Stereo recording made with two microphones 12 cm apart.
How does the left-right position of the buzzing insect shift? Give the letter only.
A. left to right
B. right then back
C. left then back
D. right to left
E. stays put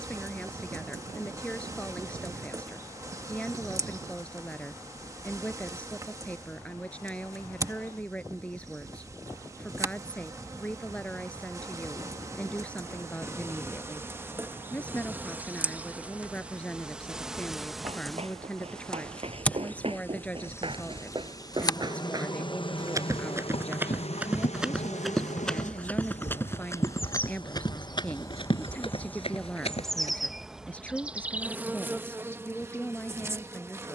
C.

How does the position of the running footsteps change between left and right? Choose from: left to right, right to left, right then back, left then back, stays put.
right to left.